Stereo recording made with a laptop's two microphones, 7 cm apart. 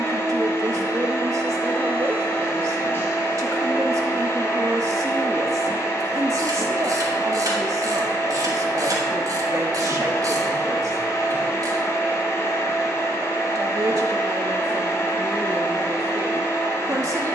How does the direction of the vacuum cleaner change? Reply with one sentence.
You can hear the vacuum cleaner stay put.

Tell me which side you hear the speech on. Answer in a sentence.
You can hear the speech on the right.